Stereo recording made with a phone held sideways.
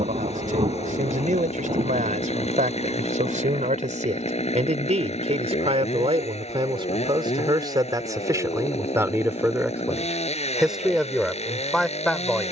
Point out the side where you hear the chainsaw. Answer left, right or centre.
left.